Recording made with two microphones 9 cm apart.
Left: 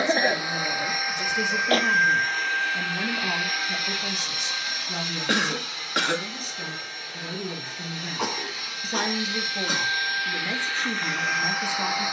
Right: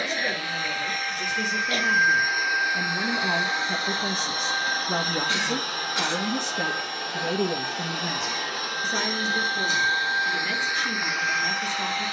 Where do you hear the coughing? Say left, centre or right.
left.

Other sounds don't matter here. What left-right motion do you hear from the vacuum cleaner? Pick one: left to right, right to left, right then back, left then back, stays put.
right then back.